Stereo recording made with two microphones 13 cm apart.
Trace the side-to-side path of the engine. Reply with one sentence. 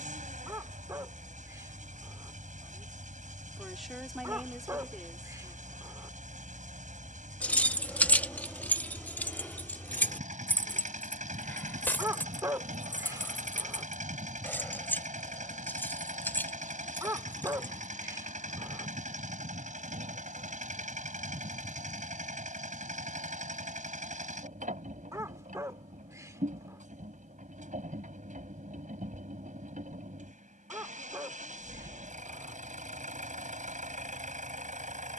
You can hear the engine stay in one place.